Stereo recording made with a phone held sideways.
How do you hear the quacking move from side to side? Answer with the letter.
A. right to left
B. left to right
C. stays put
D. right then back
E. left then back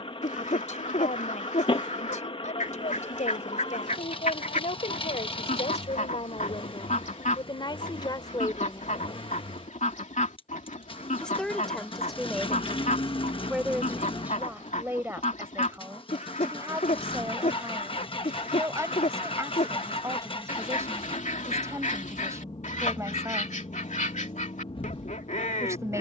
C.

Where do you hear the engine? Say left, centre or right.
left.